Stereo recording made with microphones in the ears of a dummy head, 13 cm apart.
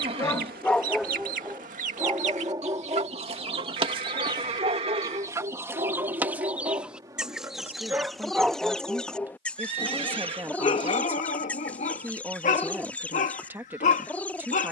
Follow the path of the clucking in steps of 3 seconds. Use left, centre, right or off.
right, right, centre, centre, centre.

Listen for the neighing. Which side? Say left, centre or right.
right.